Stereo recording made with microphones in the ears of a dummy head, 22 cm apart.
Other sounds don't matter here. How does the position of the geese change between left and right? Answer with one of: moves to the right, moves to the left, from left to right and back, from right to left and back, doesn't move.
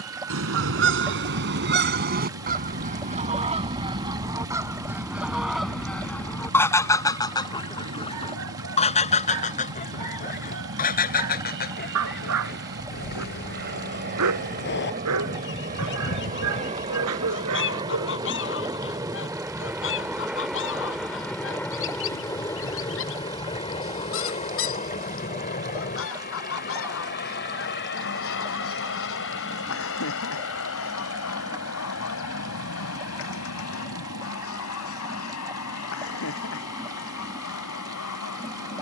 moves to the left.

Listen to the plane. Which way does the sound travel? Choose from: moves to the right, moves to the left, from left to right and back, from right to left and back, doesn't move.
moves to the left.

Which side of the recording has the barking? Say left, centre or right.
right.